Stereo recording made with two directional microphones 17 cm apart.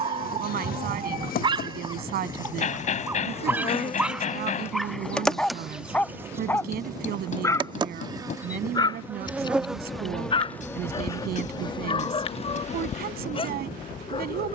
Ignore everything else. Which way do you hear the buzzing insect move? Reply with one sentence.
In this clip you hear the buzzing insect go right and come back.